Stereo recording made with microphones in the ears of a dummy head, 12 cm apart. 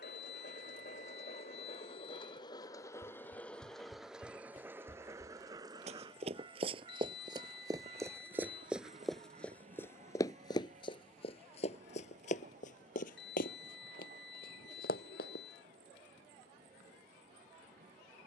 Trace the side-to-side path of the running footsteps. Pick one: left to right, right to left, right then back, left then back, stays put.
right to left.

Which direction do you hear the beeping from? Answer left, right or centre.
left.